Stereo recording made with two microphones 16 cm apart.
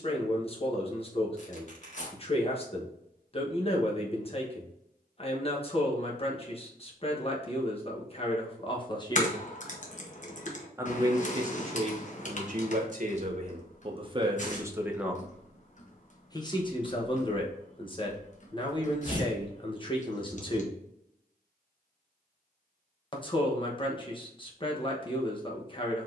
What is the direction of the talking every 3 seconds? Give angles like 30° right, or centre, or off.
40° left, 40° left, 40° left, 20° right, 40° right, 30° left, 30° left, 30° left, 30° left.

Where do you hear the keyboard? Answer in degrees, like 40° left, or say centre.
50° left.